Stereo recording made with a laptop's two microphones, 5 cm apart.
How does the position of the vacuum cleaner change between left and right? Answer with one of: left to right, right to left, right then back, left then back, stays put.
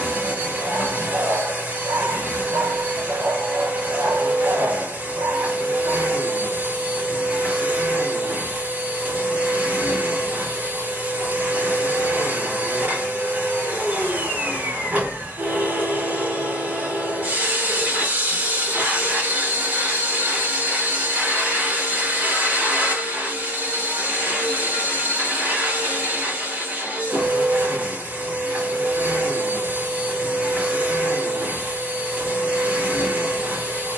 stays put.